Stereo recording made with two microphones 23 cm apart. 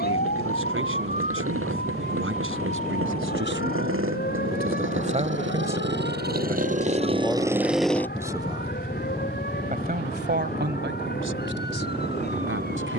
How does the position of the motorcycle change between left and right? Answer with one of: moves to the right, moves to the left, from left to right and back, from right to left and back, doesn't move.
moves to the left.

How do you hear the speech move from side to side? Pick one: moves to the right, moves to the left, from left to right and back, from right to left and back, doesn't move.
from right to left and back.